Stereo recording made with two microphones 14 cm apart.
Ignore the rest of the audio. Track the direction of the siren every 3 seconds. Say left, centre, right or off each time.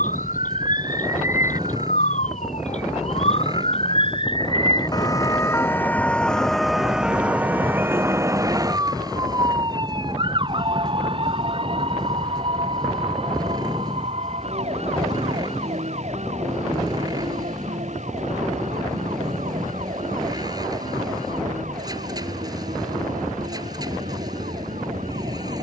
left, left, centre, right, right, right, right, right, right.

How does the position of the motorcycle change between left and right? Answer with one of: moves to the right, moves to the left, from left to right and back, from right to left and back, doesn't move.
doesn't move.